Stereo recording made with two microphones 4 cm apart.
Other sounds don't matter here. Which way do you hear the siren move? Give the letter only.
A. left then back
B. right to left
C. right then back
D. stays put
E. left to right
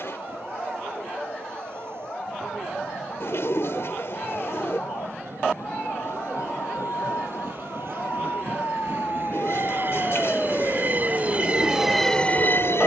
E.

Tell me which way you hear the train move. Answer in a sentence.
In this clip you hear the train move from right to left.